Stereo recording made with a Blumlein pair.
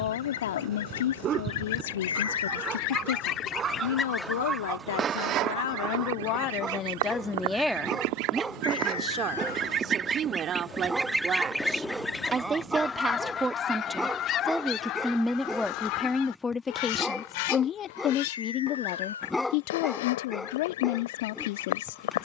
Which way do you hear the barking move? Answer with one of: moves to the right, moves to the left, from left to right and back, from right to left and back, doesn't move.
moves to the left.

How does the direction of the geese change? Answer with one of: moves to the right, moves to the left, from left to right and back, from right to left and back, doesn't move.
from left to right and back.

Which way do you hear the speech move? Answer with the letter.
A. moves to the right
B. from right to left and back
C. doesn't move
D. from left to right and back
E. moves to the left
D.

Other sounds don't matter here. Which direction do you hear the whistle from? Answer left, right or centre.
left.